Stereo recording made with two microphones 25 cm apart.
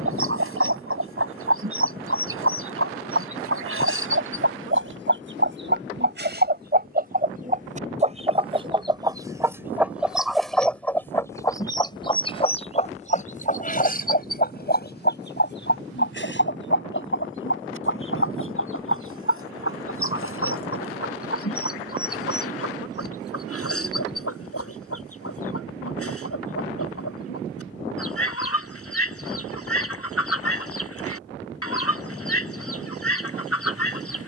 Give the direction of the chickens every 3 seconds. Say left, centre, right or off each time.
right, right, right, centre, left, left, left, left, left, left, left, left.